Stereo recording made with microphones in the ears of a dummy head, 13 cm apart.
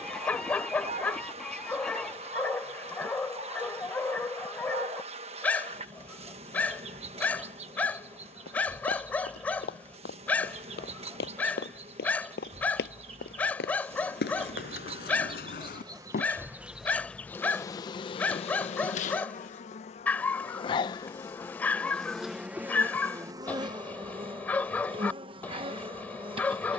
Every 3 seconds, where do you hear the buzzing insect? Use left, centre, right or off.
right, right, right, right, right, centre, left, centre, right.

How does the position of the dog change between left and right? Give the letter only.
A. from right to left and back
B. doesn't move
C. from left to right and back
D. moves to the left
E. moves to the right
B.